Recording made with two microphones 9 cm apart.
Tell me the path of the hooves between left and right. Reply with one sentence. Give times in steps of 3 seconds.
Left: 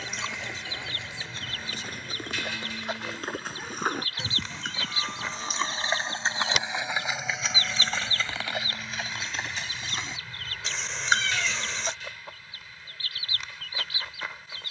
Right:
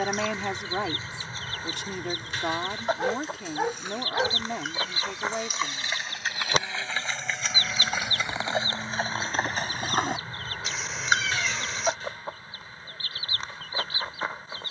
You can hear the hooves on the left from 0 s, in the centre from 6 s, on the right from 9 s and not at all from 12 s.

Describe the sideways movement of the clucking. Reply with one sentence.
In this clip you hear the clucking stay in one place.